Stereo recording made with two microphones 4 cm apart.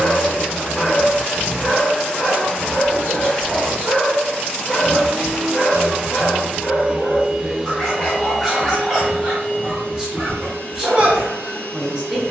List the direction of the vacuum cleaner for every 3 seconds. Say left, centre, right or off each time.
left, centre, centre, left.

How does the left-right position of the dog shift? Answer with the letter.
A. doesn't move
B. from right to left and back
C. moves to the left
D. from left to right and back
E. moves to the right
B.